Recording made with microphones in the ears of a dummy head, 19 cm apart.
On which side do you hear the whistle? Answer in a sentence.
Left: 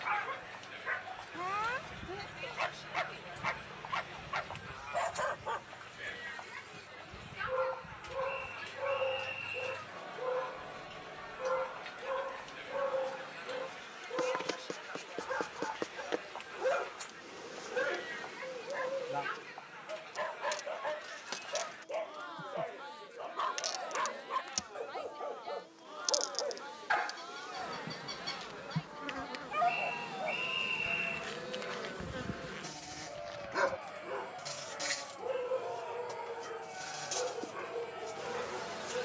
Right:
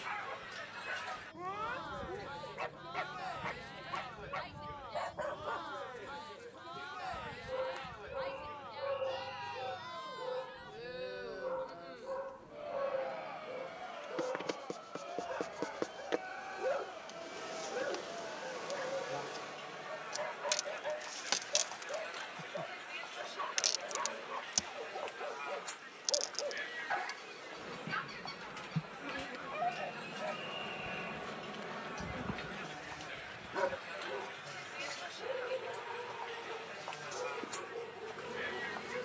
In this clip you hear the whistle on the left.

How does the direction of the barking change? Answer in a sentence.
You can hear the barking stay in one place.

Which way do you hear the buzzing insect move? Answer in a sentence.
You can hear the buzzing insect move from left to right and back again.